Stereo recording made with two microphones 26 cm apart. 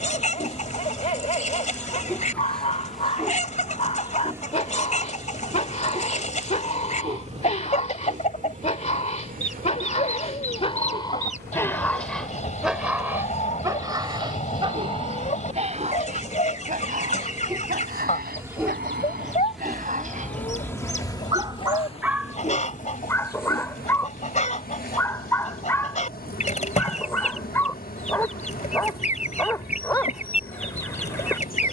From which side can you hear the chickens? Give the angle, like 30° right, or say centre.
30° left.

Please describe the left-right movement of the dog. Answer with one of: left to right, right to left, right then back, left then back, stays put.
right then back.